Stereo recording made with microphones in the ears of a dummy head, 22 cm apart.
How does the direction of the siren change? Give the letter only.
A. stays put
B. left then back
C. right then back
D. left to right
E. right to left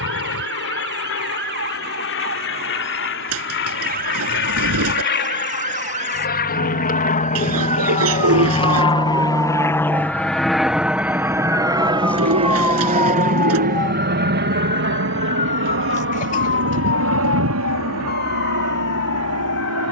E.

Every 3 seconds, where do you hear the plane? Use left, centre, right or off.
left, left, left, centre, right, right, right.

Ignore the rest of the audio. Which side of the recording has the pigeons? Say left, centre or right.
right.